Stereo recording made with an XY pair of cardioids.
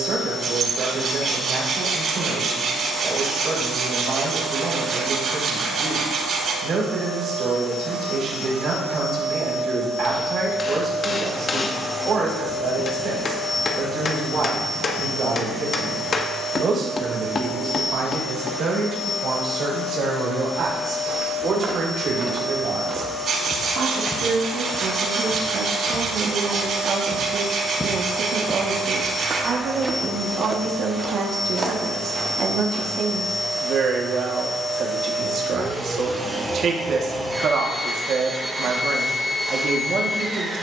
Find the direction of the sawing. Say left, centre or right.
right.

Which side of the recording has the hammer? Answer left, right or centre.
left.